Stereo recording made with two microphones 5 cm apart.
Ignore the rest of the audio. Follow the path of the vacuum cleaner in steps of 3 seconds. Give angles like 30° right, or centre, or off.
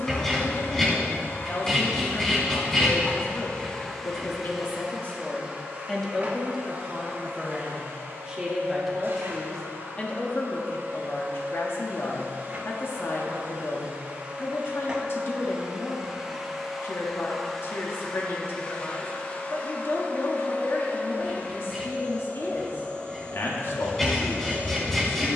50° left, centre, 40° right, 50° right, 30° right, 10° right, 30° left, 30° left, 30° left.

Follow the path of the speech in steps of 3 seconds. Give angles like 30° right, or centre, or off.
60° left, 40° left, 10° right, 40° left, 50° left, 50° left, 50° left, 50° left, 50° left.